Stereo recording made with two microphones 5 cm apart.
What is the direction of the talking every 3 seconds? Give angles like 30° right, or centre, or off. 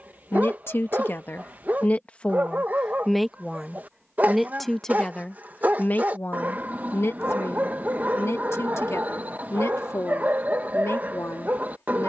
40° left, 10° left, 60° left, 70° left.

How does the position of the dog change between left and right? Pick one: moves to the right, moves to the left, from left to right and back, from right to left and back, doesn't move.
doesn't move.